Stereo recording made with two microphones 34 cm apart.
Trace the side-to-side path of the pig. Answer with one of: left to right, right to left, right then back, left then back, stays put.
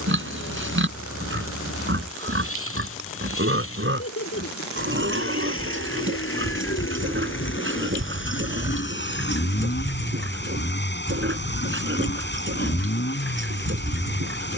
stays put.